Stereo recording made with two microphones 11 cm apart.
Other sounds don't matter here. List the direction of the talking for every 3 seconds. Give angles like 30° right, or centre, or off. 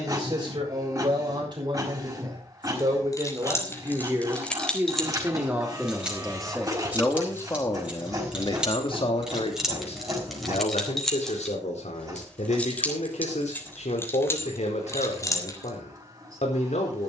40° right, 20° right, 20° left, 70° left, 80° left, 80° left.